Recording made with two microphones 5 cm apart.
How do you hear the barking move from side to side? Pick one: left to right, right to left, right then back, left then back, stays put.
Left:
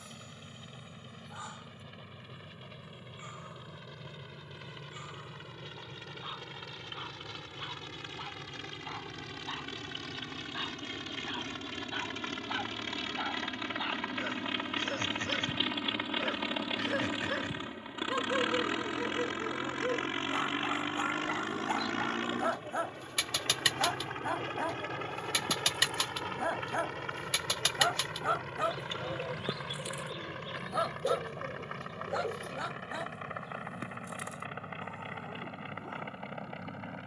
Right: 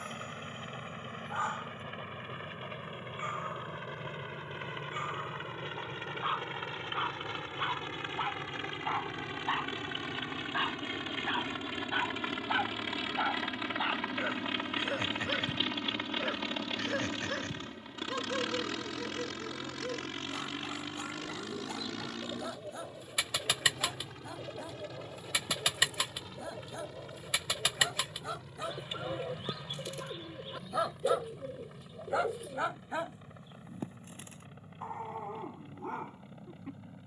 left then back.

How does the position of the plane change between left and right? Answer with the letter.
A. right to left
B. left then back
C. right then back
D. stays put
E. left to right
A.